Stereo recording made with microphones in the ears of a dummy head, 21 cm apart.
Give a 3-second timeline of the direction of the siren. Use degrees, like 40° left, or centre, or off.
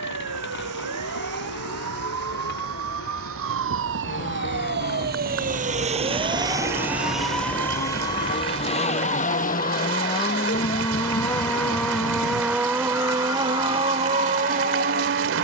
70° right, 50° right, centre, 40° left, 60° left.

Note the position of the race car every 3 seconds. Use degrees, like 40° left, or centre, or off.
50° left, 50° left, 40° left, 20° left, 20° right.